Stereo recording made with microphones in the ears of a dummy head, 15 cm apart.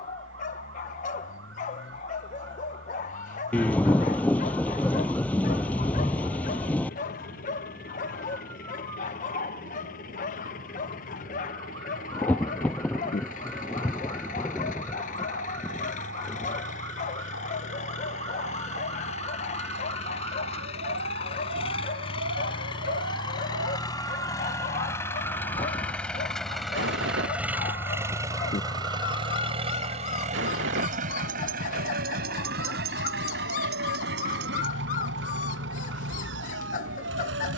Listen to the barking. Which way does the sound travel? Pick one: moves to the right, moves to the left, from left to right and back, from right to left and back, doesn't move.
doesn't move.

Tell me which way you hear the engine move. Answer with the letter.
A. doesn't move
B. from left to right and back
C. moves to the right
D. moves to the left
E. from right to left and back
C.